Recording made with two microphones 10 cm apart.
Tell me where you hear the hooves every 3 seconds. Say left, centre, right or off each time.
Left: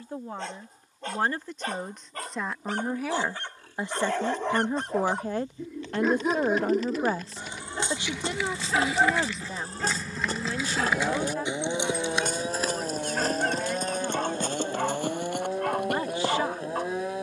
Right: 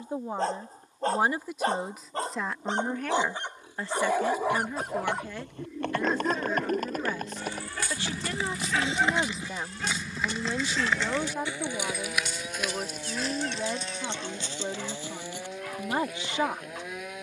off, right, right, centre, left, left.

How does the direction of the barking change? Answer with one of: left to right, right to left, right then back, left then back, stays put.
right to left.